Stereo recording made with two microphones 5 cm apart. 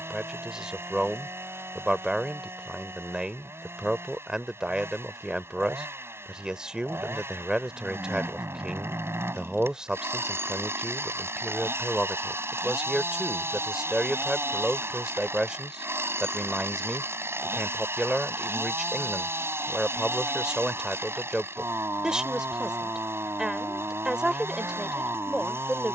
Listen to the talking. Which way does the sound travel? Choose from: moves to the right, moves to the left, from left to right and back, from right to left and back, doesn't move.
doesn't move.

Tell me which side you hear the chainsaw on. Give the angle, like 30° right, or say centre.
50° right.